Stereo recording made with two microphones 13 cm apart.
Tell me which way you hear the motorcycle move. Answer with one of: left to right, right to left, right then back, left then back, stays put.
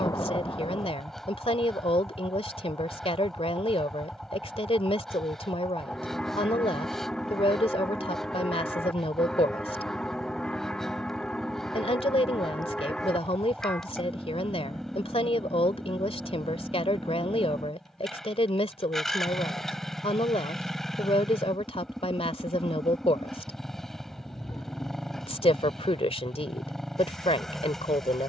stays put.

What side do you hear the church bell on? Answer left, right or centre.
centre.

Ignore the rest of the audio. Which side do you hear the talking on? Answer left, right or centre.
left.